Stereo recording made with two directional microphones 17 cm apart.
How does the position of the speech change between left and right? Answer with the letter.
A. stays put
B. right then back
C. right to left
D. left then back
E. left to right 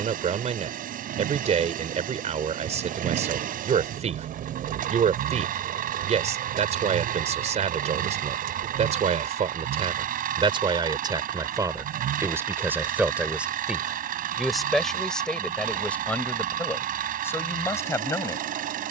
C.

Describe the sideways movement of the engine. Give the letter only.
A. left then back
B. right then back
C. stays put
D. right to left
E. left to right
C.